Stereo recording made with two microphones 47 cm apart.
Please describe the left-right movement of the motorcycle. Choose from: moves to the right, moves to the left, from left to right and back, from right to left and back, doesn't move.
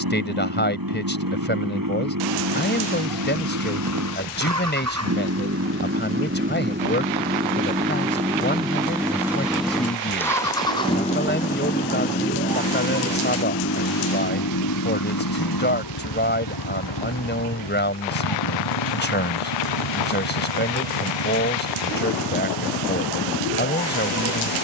moves to the left.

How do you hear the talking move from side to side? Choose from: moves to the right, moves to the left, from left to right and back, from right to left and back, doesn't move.
doesn't move.